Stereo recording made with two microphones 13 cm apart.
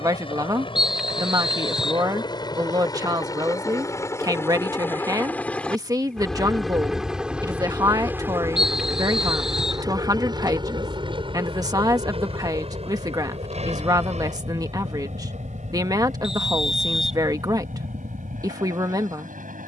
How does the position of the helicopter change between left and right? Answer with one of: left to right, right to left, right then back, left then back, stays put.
left to right.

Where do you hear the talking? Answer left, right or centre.
right.